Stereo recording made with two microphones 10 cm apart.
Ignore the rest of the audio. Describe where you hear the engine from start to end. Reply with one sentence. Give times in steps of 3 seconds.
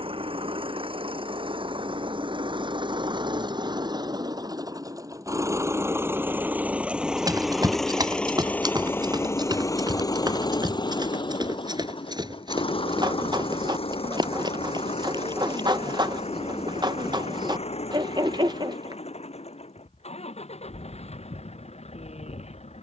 In this clip you hear the engine on the right from 0 s, in the centre from 6 s and on the left from 9 s.